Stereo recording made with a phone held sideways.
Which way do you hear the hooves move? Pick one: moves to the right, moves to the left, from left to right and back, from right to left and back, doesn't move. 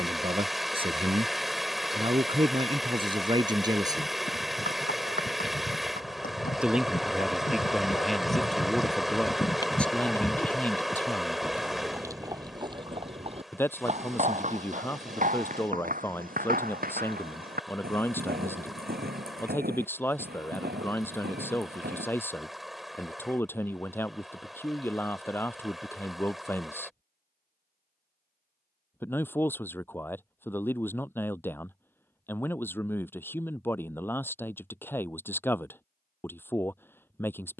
moves to the right.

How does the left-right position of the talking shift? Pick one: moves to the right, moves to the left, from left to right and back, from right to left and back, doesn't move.
moves to the left.